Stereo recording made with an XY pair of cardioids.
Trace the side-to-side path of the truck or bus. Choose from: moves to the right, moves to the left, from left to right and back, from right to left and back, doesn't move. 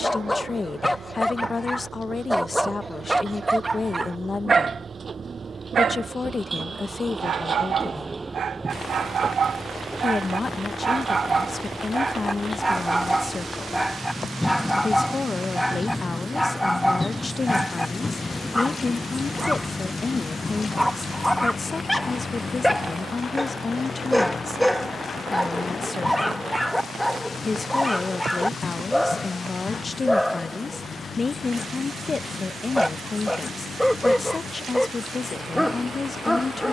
moves to the left.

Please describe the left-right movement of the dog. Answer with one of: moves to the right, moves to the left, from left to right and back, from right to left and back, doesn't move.
from left to right and back.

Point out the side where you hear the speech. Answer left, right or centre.
left.